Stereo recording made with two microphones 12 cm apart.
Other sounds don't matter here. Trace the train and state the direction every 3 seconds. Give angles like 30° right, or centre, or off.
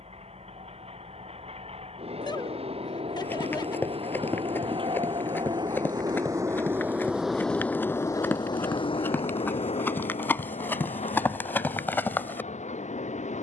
70° right, 50° right, 10° left, 70° left, 80° left.